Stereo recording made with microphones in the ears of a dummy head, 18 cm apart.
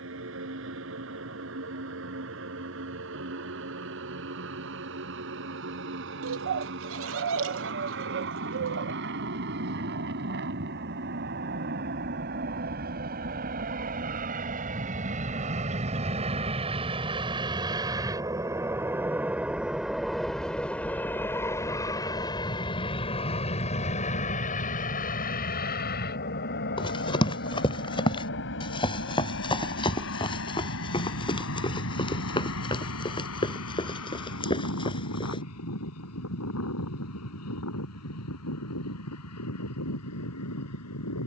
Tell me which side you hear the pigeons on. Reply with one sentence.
You can hear the pigeons on the right.